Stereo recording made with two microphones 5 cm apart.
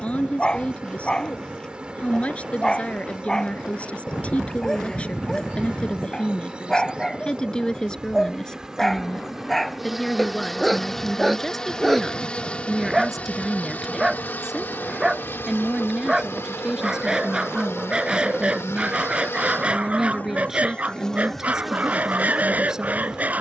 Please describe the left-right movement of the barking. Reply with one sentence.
You can hear the barking move from left to right.